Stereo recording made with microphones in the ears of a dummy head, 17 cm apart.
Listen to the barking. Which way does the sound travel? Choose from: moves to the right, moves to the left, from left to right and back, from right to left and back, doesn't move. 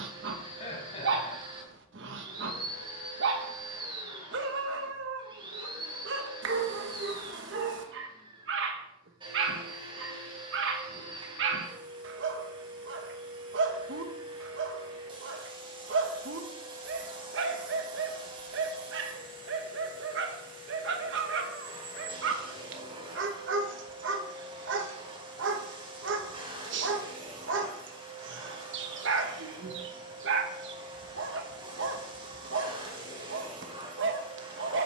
doesn't move.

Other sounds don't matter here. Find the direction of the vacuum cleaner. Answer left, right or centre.
right.